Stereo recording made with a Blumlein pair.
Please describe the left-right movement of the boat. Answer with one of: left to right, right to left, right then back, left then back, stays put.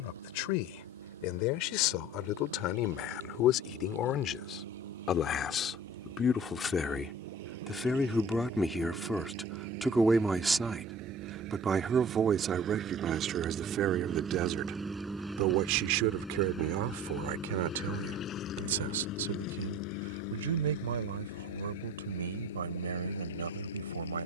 right to left.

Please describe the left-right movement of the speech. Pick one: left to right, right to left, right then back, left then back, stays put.
left to right.